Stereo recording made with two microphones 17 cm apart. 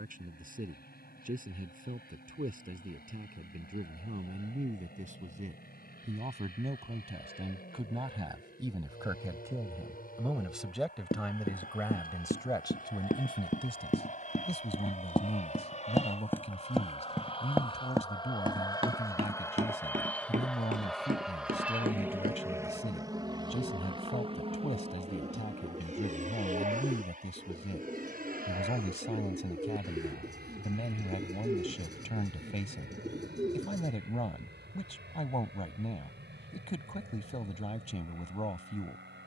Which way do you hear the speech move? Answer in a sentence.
You can hear the speech go from the right side to the left.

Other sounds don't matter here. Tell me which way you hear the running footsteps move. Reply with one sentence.
In this clip you hear the running footsteps move to the right.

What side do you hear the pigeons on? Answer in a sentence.
In this clip you hear the pigeons on the right.